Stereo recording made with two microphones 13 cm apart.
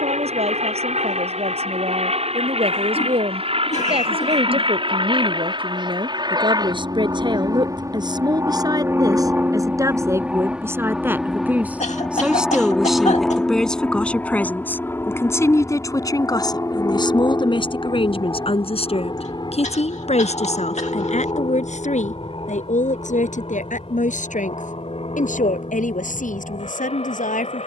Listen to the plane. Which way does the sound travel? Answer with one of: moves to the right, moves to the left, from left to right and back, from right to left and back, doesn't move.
moves to the left.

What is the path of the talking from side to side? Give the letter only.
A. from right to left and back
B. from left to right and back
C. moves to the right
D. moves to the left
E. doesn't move
D.